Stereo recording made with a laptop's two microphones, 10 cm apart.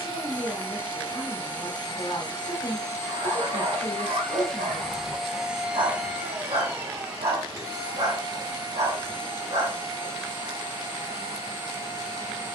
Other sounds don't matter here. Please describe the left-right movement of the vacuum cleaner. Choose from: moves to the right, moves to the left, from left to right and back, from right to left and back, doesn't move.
moves to the right.